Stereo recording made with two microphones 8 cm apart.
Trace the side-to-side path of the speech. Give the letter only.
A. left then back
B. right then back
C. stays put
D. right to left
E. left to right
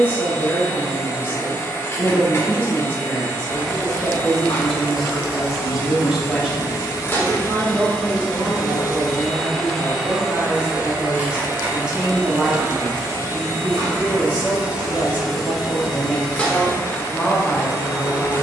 B.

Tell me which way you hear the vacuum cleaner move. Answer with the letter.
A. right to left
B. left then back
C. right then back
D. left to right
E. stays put
C.